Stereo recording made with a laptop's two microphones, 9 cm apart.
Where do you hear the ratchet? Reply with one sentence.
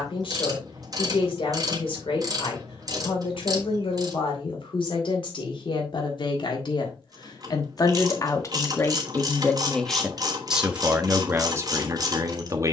In this clip you hear the ratchet on the right.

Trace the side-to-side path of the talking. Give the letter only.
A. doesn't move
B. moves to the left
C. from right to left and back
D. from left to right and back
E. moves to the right
E.